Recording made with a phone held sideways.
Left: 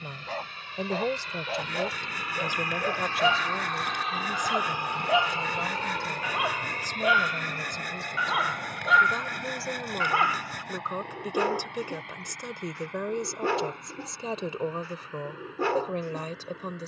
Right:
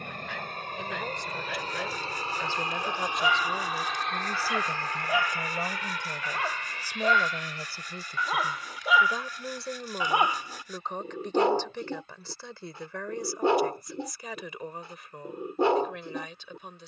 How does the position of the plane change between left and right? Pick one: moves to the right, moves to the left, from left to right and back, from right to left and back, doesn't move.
moves to the left.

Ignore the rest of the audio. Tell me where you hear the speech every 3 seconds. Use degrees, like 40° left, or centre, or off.
30° left, 10° right, 10° right, 10° left, 20° left, 40° left.